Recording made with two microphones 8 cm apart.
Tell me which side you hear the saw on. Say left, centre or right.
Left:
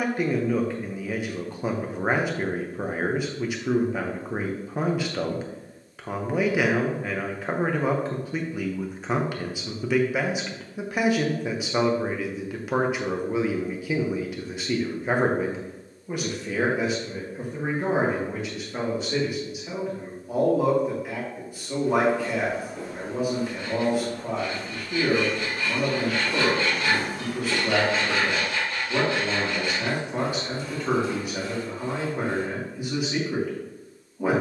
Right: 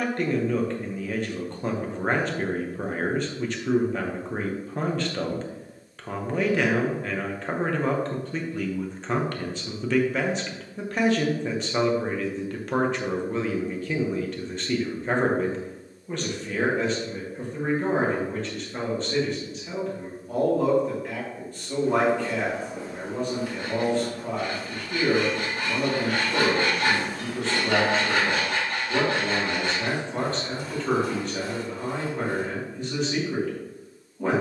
right.